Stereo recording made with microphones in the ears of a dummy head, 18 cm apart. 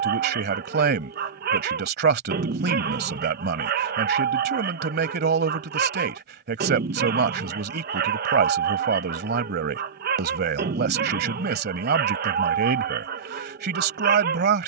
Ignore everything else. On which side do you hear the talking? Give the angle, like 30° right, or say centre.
50° right.